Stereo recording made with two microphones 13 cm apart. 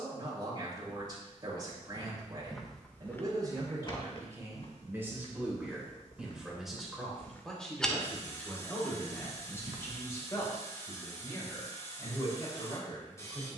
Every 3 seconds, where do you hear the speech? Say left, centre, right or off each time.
right, right, centre, left, left.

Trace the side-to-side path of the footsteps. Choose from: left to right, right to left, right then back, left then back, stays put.
left then back.